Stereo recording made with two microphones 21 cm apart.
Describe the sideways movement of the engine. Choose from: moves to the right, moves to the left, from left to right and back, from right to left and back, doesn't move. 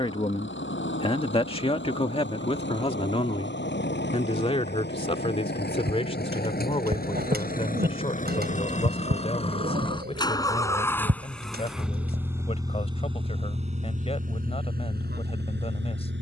moves to the right.